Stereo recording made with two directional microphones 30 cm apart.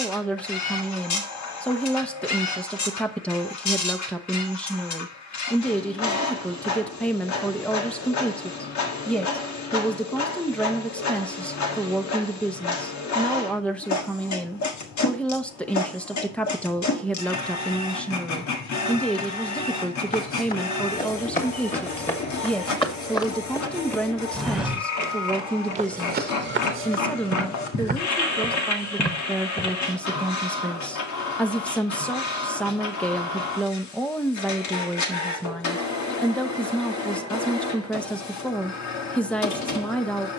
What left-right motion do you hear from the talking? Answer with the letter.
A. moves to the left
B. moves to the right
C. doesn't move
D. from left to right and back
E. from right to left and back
C.